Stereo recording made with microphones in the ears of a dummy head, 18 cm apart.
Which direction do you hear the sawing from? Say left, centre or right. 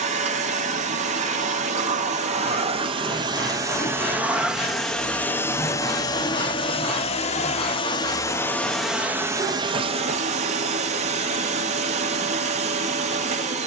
centre.